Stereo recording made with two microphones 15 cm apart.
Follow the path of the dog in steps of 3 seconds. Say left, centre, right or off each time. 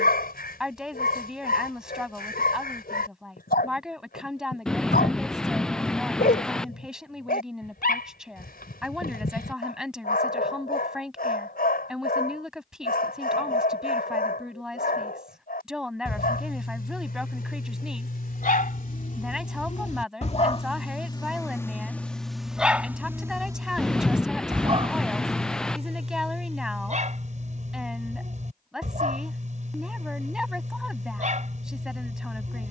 left, left, left, left, left, left, left, centre, right, right, right.